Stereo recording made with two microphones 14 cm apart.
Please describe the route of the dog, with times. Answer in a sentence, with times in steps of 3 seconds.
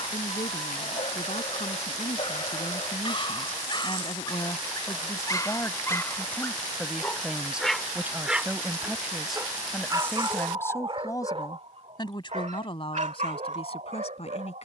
You can hear the dog on the left from 0 s, in the centre from 6 s and on the right from 9 s.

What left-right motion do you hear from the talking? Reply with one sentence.
In this clip you hear the talking go right and come back.